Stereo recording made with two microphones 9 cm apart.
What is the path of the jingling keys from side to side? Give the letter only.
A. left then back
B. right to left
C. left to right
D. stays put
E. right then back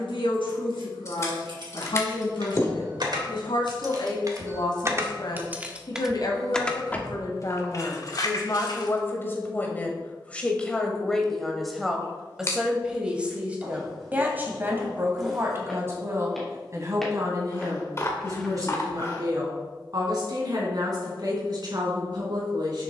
B.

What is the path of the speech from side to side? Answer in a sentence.
In this clip you hear the speech move from left to right.